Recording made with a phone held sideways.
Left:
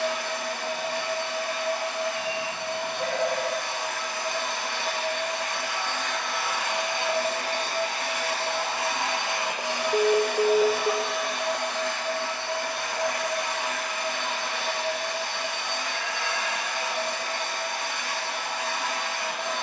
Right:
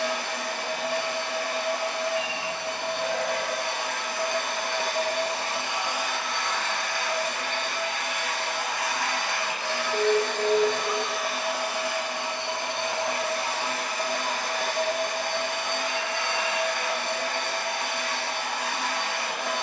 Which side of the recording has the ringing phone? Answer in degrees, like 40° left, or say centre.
60° left.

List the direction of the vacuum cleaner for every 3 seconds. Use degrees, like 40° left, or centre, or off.
70° right, 50° right, 20° left, 10° left, 30° right, 60° right, 70° right.